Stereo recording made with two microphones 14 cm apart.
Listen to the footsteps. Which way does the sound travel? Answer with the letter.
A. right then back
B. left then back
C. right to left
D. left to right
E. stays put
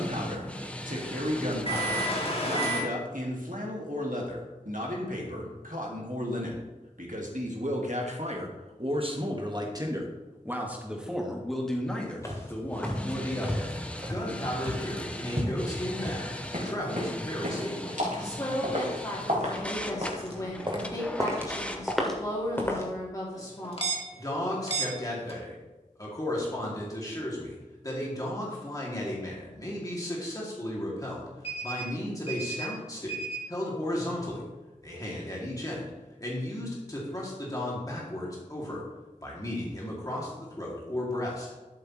A.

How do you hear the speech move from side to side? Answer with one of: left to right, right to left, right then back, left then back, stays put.
right to left.